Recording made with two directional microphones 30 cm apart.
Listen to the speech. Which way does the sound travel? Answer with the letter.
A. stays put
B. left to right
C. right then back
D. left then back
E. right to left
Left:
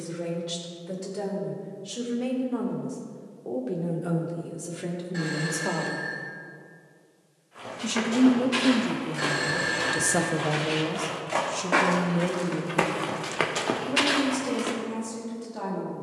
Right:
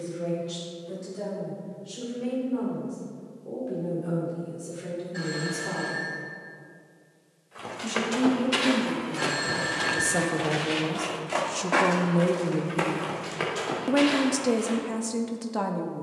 B.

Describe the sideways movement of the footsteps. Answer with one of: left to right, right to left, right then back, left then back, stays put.
right to left.